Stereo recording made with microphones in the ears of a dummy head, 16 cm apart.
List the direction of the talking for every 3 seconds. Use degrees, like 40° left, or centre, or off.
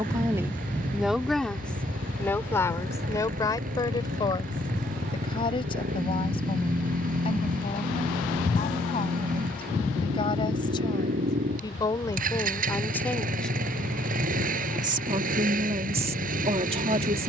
centre, 30° left, 30° left, 30° left, 10° left, 30° right.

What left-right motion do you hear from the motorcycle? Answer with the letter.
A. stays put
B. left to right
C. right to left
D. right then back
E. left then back
A.